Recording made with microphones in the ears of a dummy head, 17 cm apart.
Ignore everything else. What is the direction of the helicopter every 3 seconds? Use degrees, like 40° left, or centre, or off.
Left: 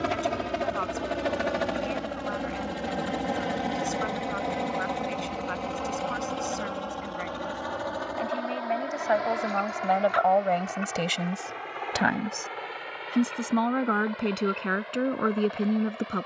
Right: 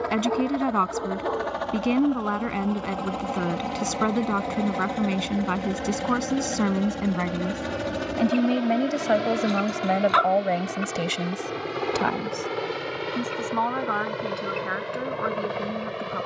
30° left, centre, 30° right, 50° right, 60° right, 60° right.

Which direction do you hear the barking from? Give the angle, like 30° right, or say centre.
80° right.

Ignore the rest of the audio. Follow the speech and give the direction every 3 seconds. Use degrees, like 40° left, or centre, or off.
80° right, 80° right, 70° right, 20° right, 30° left, 40° left.